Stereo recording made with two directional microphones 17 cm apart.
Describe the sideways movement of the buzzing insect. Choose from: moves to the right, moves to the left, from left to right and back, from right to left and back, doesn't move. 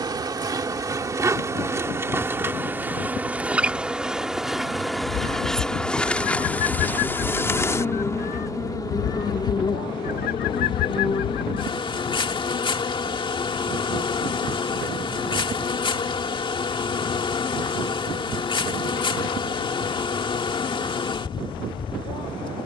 moves to the left.